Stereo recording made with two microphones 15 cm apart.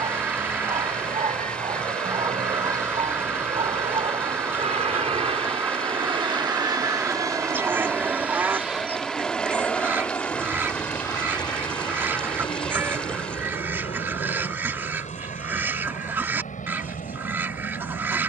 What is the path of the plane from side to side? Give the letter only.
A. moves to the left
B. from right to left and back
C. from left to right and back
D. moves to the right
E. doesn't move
A.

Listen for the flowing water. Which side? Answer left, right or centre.
centre.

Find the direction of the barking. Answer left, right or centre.
right.